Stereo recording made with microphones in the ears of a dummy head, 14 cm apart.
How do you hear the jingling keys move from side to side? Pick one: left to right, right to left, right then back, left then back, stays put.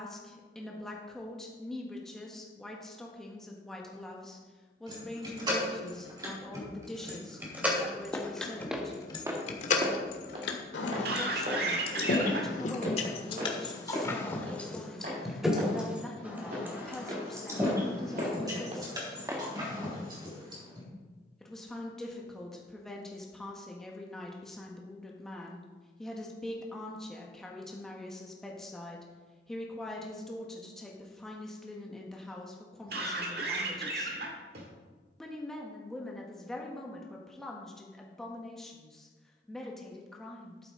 left then back.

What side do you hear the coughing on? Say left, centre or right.
right.